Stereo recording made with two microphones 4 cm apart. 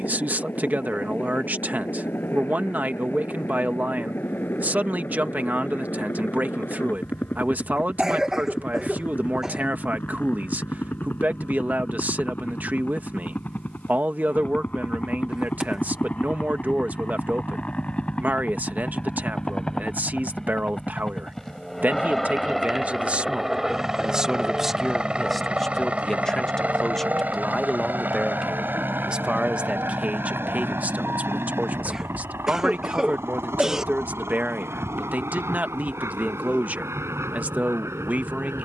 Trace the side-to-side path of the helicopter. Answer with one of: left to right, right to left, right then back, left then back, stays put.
left to right.